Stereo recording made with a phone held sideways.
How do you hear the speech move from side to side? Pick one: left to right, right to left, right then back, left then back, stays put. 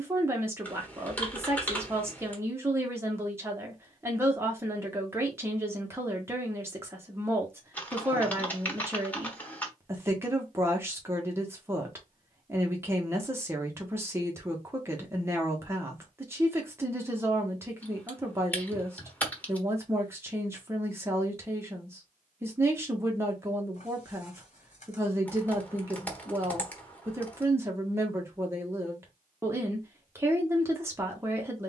stays put.